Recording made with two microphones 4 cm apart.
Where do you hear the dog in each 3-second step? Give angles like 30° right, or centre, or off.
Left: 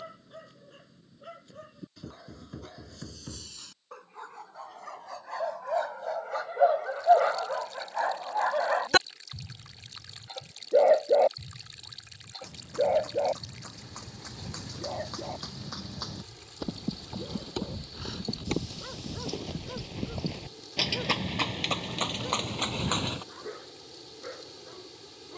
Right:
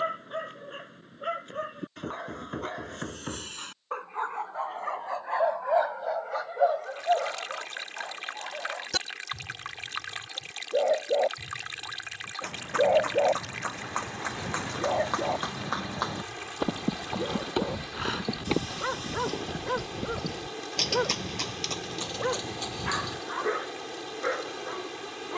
60° right, 40° right, 30° left, 20° left, 20° right, 40° right, 50° right, 60° right, 60° right.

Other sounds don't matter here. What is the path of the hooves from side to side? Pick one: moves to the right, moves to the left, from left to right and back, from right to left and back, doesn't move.
moves to the left.